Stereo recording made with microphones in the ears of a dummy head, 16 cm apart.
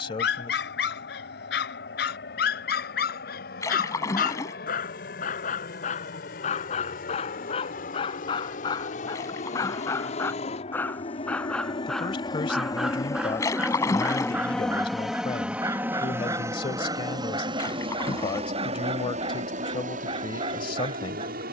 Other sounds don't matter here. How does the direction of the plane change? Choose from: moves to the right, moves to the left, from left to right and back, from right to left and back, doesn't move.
moves to the right.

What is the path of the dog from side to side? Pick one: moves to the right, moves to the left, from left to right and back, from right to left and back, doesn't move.
moves to the right.